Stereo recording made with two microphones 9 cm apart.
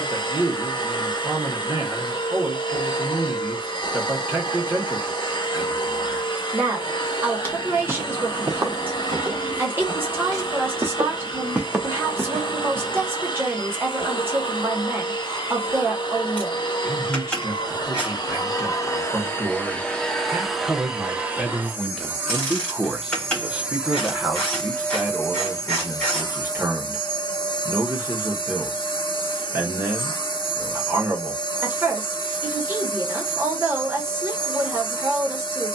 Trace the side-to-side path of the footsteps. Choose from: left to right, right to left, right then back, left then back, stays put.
right then back.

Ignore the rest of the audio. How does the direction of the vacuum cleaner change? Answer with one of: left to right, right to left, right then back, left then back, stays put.
right then back.